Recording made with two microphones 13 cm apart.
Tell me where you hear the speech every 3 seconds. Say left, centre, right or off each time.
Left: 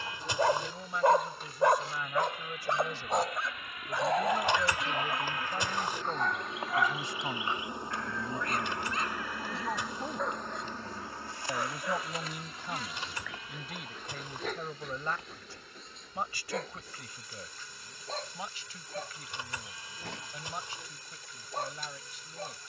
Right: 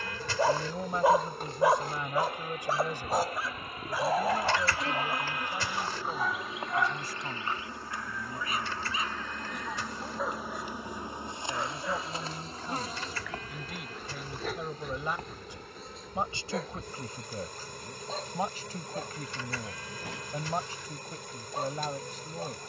right, centre, left, left, centre, right, right, right.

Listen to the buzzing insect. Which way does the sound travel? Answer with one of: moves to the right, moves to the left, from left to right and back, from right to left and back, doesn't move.
from right to left and back.